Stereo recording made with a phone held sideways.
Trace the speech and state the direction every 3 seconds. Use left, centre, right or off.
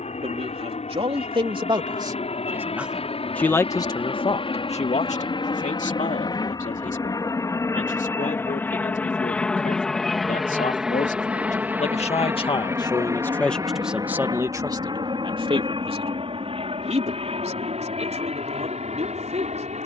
right, left, left, left, centre, right, right.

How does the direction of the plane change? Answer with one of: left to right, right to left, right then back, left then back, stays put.
left to right.